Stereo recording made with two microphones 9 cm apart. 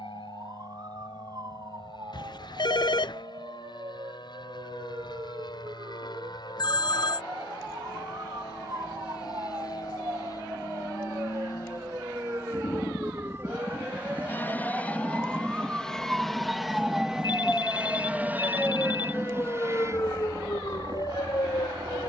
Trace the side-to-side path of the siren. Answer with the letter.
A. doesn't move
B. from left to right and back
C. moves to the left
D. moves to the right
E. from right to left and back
C.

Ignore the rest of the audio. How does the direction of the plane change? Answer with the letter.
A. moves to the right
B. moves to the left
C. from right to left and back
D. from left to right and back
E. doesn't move
A.